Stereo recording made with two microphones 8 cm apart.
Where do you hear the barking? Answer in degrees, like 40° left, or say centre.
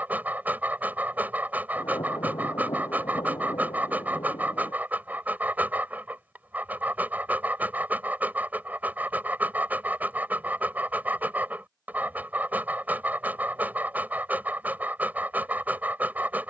20° right.